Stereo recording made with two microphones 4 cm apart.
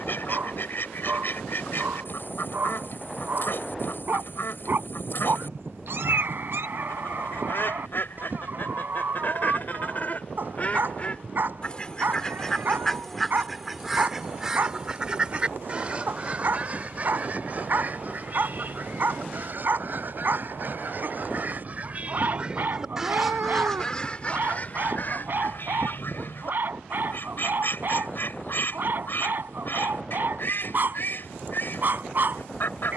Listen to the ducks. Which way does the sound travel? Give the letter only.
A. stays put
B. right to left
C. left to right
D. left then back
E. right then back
E.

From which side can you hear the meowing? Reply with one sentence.
You can hear the meowing on the right.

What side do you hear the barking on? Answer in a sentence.
You can hear the barking on the right.